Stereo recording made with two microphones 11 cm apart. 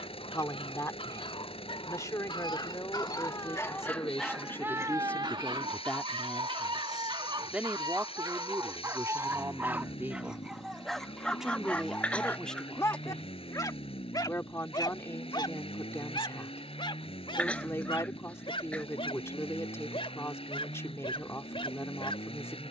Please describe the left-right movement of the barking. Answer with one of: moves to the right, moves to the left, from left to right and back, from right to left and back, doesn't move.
from left to right and back.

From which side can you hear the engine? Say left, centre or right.
left.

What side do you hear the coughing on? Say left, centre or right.
centre.